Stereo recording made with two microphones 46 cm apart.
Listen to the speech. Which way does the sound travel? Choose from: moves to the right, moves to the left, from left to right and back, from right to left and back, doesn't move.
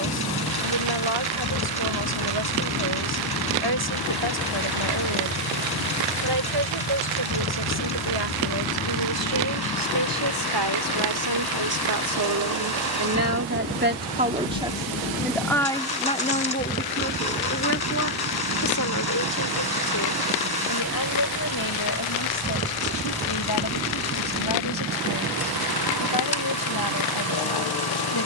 moves to the left.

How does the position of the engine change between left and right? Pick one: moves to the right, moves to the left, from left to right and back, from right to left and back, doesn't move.
doesn't move.